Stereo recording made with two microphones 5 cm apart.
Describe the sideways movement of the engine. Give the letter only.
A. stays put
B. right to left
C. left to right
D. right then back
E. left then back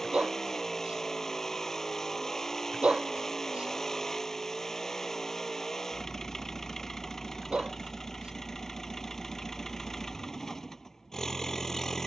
A.